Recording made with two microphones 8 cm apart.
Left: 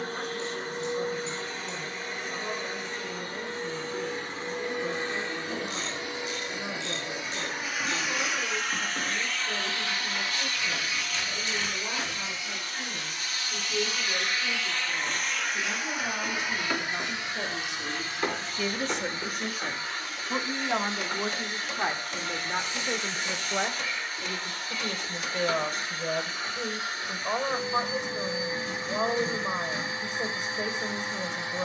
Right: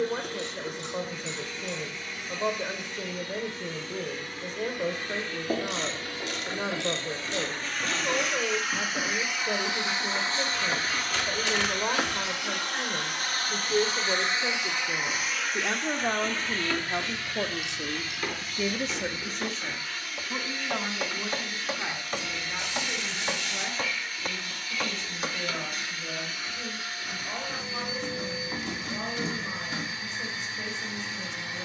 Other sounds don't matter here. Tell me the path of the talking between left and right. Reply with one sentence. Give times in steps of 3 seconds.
In this clip you hear the talking on the right from 0 s, in the centre from 18 s and on the left from 21 s.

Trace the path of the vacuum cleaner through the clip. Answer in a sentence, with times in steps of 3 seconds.
In this clip you hear the vacuum cleaner on the left from 0 s, in the centre from 6 s, on the right from 9 s, in the centre from 15 s and on the left from 18 s.